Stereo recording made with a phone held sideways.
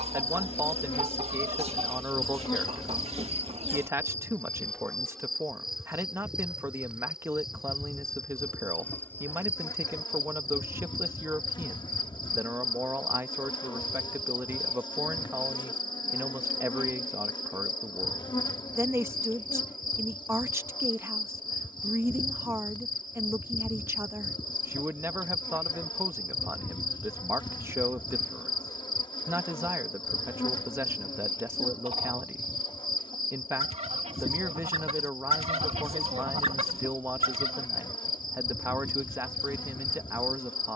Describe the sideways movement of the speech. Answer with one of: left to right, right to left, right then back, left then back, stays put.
stays put.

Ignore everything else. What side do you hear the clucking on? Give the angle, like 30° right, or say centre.
40° right.